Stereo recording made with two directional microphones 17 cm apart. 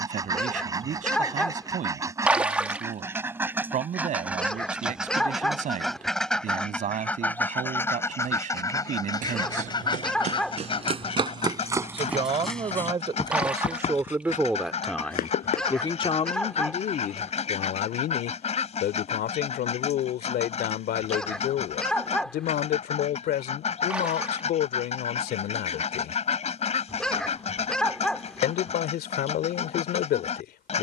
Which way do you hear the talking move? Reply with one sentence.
In this clip you hear the talking travel towards the left.